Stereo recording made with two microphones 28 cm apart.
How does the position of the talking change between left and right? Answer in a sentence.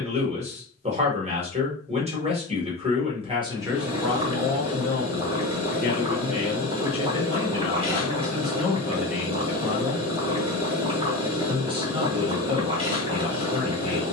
You can hear the talking go left and come back.